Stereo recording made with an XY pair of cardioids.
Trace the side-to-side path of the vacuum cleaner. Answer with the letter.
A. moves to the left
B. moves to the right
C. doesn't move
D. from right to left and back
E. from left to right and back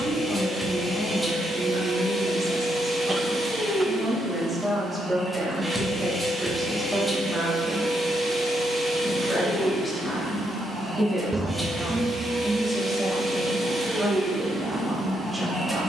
C.